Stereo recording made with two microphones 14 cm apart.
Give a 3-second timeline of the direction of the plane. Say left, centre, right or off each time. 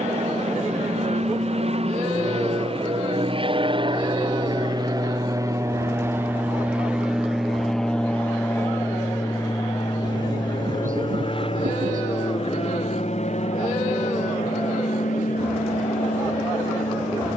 right, right, centre, left, left, left.